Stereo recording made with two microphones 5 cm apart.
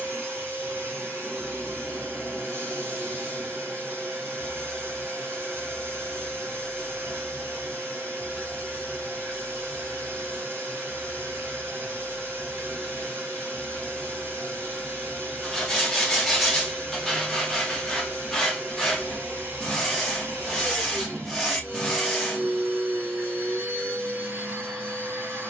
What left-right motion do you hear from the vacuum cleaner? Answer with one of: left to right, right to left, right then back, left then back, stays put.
stays put.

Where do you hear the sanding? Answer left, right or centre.
centre.